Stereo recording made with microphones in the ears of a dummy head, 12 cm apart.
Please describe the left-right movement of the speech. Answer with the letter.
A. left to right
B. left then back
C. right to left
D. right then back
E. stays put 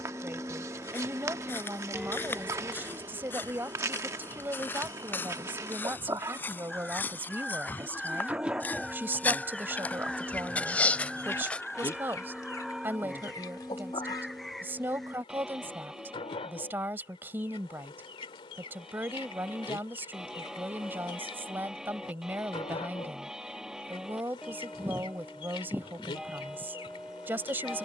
E.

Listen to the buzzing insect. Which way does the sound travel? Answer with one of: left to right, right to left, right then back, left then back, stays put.
right to left.